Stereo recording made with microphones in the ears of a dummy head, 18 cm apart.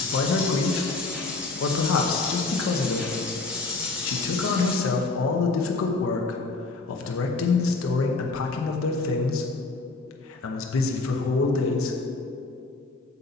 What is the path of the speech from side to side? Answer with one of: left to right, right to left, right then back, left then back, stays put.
stays put.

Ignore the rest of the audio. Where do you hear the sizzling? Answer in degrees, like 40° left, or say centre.
10° right.